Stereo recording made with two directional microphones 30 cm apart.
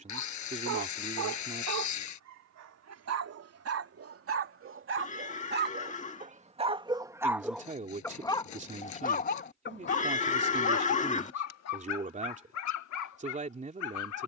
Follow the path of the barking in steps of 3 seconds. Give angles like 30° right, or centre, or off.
60° right, 40° right, centre, 40° left, 60° left.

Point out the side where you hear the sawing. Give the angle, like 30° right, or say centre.
60° left.